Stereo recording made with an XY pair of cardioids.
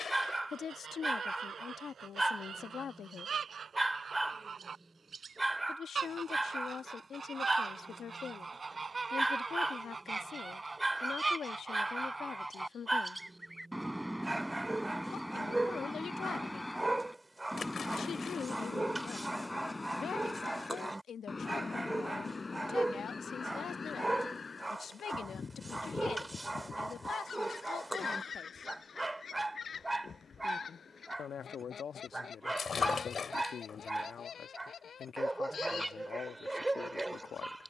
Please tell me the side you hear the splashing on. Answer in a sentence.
You can hear the splashing on the left.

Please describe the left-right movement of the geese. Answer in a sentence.
In this clip you hear the geese travel towards the left.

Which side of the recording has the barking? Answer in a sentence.
In this clip you hear the barking in the centre.